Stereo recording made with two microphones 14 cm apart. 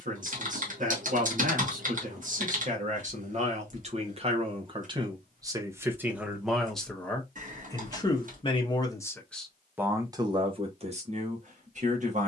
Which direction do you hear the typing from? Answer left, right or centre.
right.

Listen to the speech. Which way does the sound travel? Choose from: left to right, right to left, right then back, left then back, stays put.
left then back.